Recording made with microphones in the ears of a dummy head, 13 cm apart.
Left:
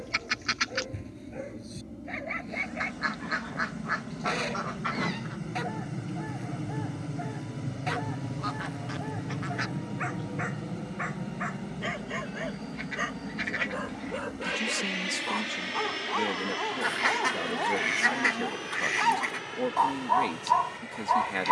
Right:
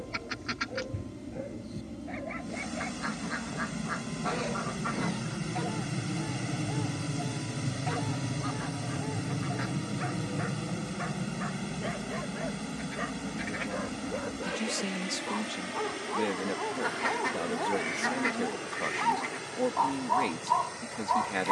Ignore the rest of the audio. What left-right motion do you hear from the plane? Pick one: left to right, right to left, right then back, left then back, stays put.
right to left.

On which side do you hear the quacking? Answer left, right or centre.
left.